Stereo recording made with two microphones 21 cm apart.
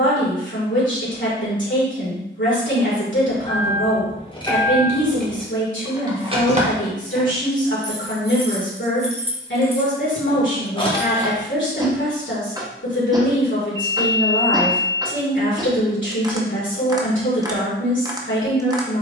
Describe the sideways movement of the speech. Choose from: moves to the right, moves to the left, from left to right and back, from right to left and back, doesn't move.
doesn't move.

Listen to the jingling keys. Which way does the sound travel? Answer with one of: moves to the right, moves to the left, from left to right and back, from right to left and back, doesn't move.
from left to right and back.